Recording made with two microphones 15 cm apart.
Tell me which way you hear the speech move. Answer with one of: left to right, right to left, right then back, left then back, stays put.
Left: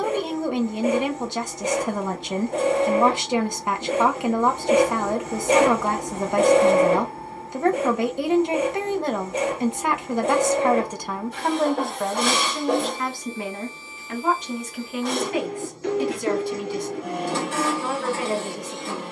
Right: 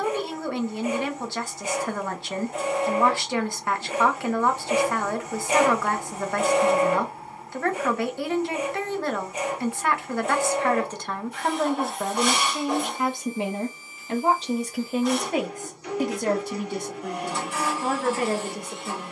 left to right.